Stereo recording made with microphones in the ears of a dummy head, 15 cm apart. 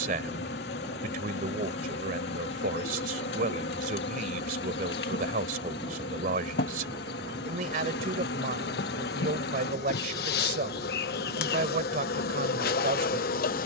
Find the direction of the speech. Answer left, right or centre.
right.